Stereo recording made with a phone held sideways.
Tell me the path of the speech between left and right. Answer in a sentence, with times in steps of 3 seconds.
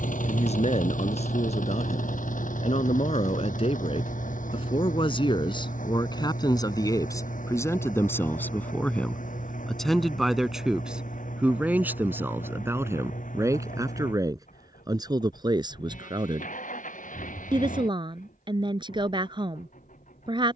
You can hear the speech on the left from 0 s, in the centre from 9 s and on the right from 12 s.